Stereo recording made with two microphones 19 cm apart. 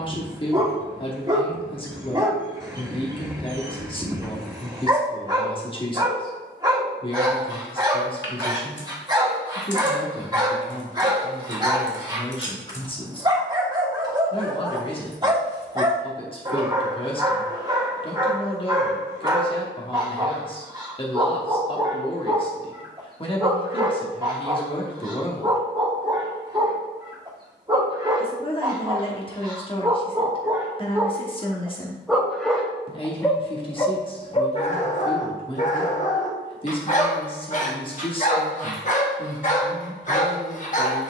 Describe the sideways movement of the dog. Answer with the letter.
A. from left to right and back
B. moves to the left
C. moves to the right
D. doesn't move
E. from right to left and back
B.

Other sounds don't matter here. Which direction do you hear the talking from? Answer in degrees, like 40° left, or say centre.
30° left.